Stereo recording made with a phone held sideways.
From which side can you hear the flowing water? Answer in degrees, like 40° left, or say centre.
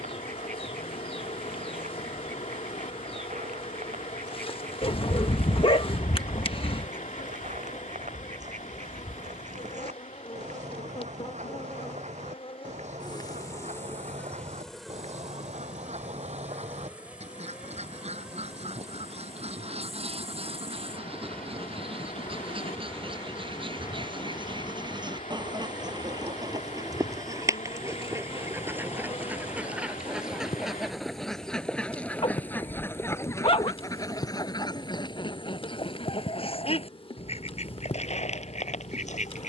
70° left.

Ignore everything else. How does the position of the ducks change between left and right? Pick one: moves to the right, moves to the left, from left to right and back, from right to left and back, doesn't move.
moves to the left.